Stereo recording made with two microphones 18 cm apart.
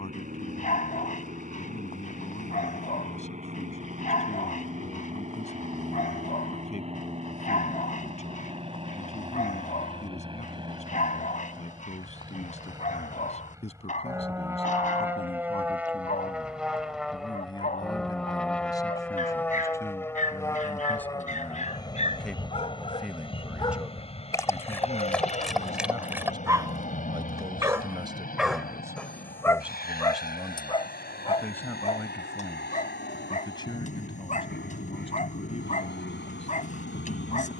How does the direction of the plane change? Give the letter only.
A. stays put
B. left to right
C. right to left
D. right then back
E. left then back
C.